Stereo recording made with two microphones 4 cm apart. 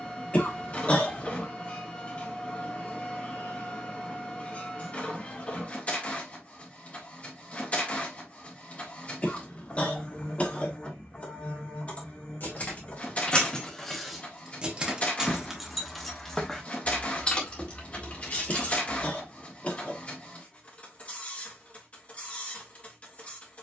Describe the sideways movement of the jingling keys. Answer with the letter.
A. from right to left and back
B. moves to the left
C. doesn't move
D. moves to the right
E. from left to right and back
E.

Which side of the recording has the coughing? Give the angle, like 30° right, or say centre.
30° left.